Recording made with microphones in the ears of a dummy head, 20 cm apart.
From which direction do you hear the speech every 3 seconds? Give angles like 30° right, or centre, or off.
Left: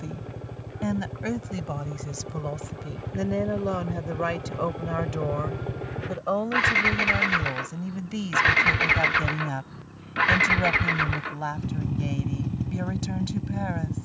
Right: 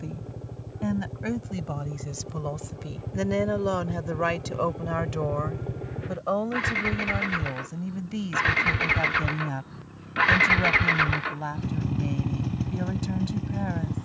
10° left, 10° right, 10° left, 20° left, 20° left.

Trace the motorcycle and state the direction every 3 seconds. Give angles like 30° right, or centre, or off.
60° left, 50° left, 30° left, 10° right, 40° right.